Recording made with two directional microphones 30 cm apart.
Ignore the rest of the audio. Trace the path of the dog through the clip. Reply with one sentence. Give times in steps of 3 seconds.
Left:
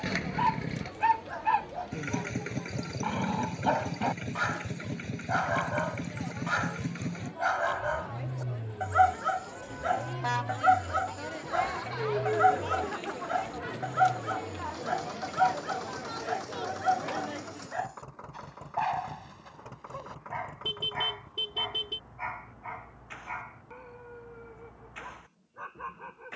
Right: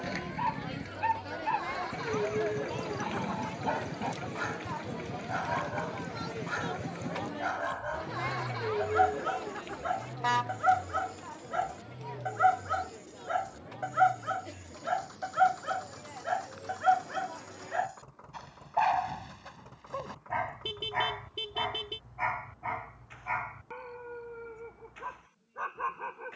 In this clip you hear the dog on the left from 0 s, in the centre from 9 s and on the right from 15 s.